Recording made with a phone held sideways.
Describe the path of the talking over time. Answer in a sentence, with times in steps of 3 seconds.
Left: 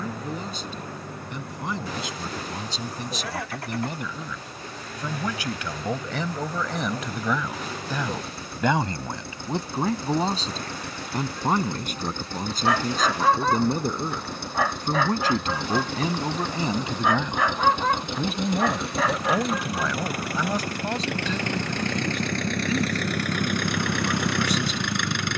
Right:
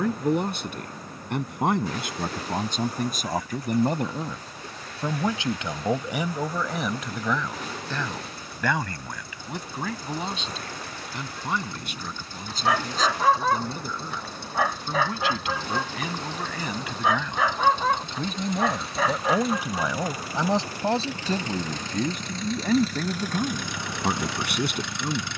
In this clip you hear the talking on the right from 0 s, in the centre from 6 s, on the left from 9 s, in the centre from 18 s and on the right from 21 s.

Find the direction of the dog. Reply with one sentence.
You can hear the dog in the centre.